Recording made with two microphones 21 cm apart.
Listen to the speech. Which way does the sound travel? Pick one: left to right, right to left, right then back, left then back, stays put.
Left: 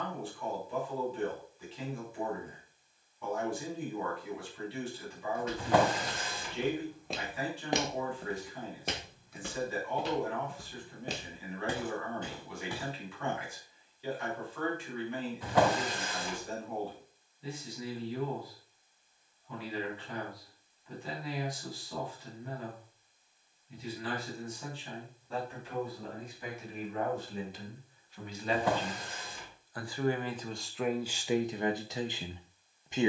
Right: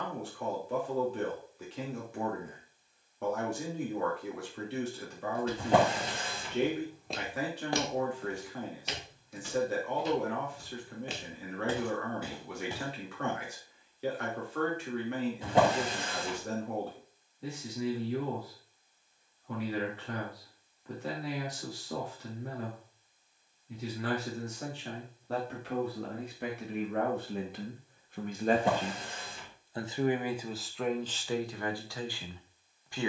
right to left.